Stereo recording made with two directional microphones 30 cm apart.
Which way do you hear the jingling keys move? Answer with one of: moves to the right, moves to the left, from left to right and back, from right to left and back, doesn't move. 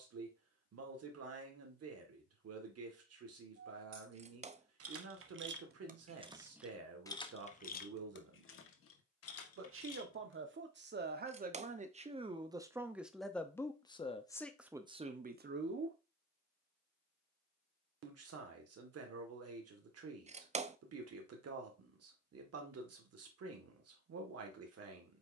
moves to the left.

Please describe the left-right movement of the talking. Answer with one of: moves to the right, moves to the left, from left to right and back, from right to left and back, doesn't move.
from right to left and back.